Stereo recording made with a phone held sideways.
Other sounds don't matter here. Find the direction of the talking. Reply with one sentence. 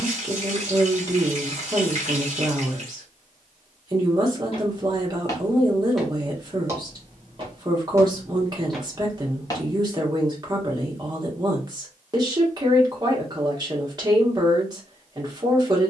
You can hear the talking on the right.